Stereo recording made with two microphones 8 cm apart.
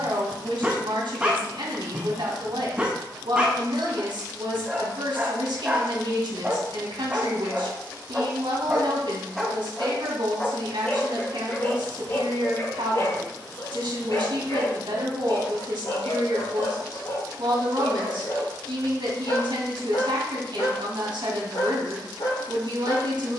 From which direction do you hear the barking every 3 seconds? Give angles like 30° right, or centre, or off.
20° right, 20° right, 20° right, 20° left, 40° left, 60° left, 70° left, 70° left.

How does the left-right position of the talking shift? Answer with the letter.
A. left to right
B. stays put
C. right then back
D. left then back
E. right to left
B.